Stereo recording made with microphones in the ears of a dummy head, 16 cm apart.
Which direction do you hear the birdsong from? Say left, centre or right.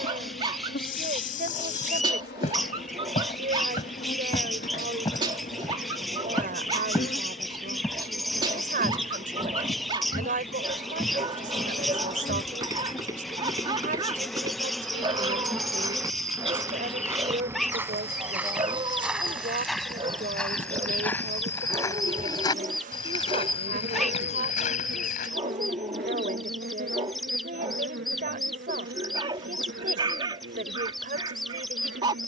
centre.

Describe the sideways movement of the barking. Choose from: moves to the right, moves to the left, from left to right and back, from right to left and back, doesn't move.
doesn't move.